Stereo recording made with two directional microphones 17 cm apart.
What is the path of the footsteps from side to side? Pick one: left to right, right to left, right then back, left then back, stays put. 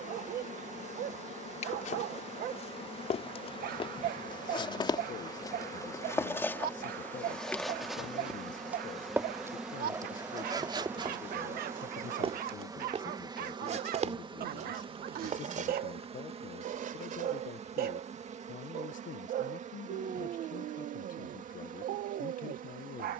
left to right.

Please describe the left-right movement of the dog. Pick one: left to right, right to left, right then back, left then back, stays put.
stays put.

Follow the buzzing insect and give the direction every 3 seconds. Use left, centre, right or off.
left, left, centre, centre, right, right, right, right.